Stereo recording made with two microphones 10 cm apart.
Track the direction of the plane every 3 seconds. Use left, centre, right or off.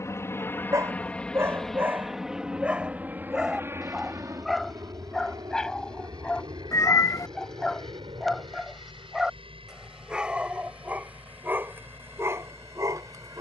centre, right, right, right, right.